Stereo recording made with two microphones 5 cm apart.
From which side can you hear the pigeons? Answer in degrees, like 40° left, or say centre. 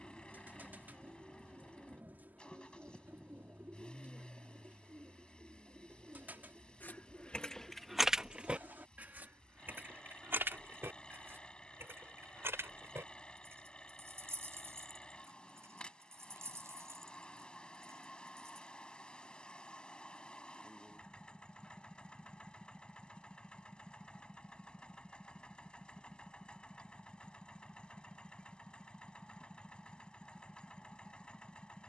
40° right.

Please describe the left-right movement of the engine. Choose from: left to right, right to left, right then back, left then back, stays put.
stays put.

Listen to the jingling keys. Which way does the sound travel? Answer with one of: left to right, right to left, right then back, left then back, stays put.
left to right.